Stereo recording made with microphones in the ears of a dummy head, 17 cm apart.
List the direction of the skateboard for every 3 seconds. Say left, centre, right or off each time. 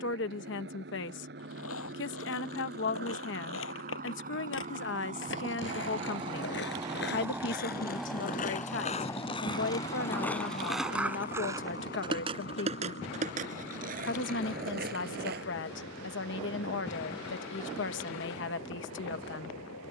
left, left, left, centre, right, right, off.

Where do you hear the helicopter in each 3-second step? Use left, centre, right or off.
right, right, centre, left, left, left, left.